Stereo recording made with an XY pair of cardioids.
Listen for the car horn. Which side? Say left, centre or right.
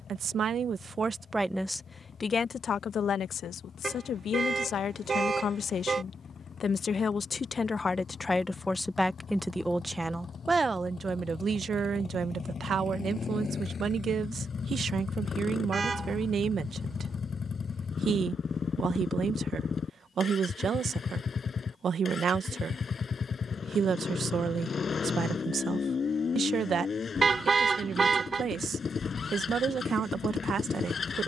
right.